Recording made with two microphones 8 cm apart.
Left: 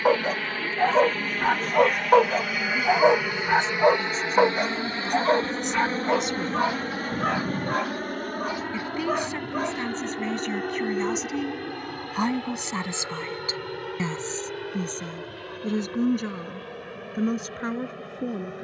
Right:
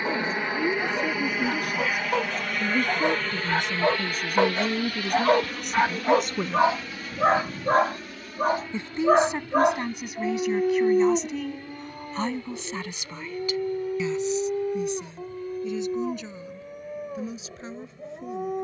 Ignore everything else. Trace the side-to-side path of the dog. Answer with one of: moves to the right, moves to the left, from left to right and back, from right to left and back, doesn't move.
moves to the right.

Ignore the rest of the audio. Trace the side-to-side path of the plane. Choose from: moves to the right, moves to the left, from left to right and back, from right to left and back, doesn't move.
moves to the left.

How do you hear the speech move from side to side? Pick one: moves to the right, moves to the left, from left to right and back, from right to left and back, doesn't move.
moves to the left.